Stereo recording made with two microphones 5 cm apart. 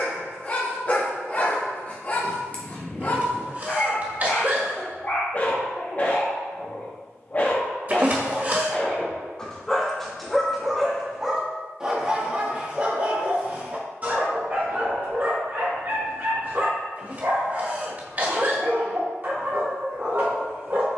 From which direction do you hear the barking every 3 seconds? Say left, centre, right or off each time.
left, left, left, centre, right, right, right.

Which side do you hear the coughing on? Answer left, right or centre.
right.